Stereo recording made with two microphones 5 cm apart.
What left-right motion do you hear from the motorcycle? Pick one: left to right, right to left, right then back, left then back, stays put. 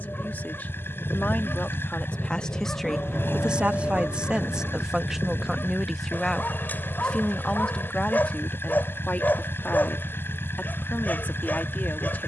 stays put.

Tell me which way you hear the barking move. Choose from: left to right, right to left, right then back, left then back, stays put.
stays put.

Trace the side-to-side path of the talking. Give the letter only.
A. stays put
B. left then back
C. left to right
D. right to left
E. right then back
E.